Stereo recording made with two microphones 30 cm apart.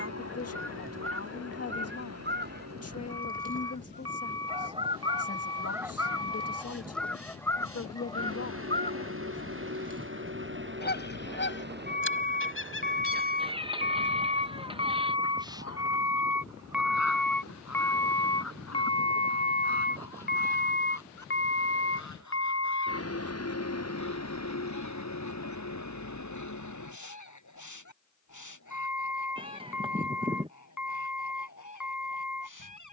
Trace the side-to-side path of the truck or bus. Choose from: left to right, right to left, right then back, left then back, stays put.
right to left.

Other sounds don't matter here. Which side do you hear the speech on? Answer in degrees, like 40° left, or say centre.
50° left.